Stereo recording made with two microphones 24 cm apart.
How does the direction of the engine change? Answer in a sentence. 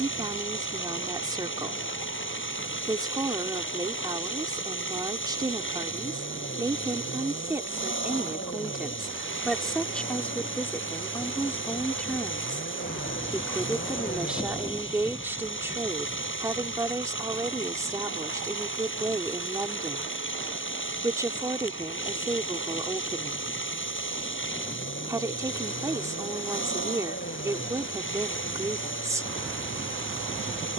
You can hear the engine stay in one place.